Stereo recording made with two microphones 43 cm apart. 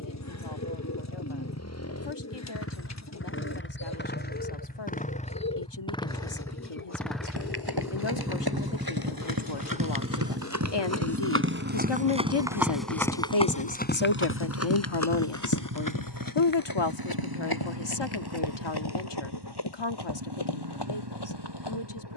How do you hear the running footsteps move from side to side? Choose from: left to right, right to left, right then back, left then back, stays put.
right to left.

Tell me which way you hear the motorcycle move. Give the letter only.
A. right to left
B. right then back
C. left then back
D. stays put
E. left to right
E.